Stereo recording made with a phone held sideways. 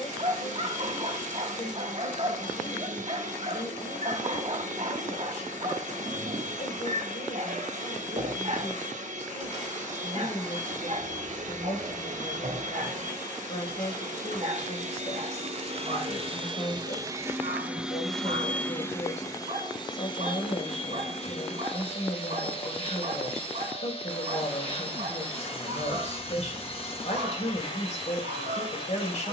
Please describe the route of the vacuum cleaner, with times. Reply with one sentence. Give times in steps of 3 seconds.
You can hear the vacuum cleaner on the right from 0 s and on the left from 18 s.